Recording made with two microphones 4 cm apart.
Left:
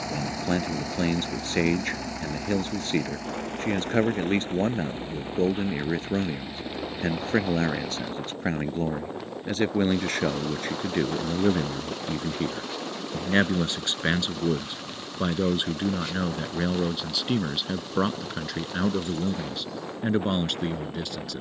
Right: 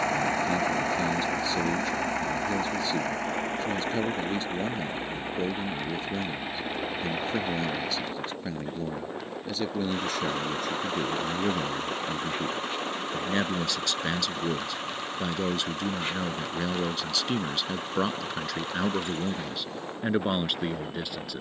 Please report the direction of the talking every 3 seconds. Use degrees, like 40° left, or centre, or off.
50° left, 50° left, 50° left, 50° left, 30° left, 10° left, centre.